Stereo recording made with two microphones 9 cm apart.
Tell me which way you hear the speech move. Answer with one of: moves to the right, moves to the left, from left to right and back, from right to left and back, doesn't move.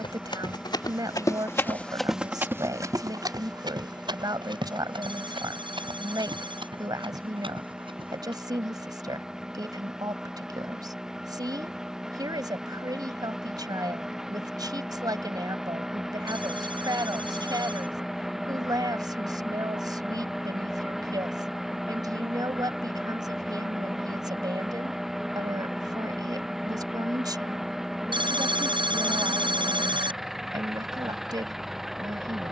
doesn't move.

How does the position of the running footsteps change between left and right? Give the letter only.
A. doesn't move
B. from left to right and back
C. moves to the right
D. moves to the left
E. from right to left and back
C.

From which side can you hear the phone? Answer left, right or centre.
right.